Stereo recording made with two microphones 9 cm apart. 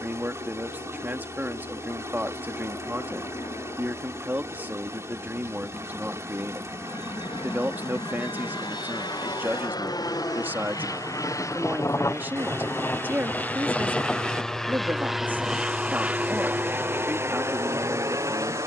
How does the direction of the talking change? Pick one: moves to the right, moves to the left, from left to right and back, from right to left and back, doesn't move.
doesn't move.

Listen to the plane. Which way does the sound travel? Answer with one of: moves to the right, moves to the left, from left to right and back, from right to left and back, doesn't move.
moves to the right.